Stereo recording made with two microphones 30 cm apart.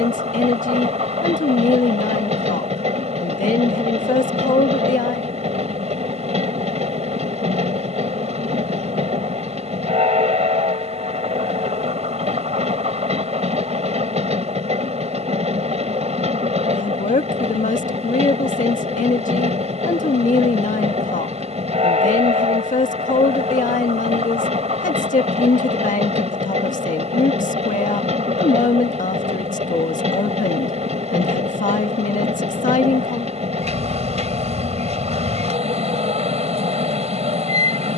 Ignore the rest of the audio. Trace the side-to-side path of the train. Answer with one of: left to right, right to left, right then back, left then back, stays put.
stays put.